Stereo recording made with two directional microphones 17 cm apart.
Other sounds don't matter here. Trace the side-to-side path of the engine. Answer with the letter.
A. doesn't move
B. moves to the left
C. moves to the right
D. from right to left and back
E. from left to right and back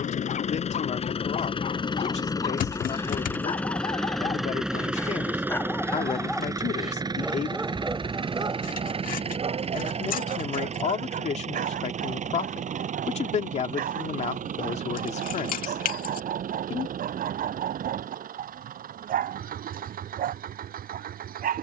C.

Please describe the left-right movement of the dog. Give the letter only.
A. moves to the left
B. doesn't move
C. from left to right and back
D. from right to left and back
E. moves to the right
E.